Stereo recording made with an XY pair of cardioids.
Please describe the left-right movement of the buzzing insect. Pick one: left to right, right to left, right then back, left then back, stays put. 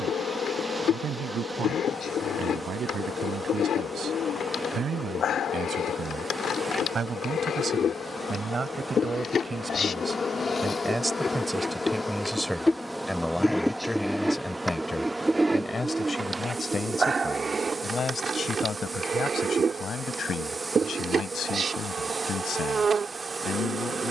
left to right.